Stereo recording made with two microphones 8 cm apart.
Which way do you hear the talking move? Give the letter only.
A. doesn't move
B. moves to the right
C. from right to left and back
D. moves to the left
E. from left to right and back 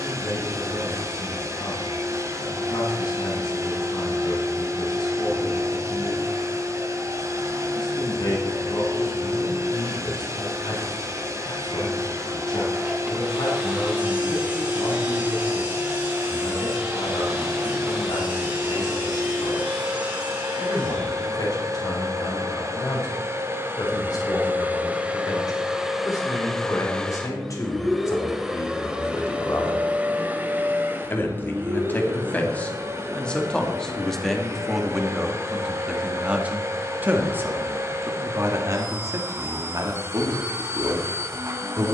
B.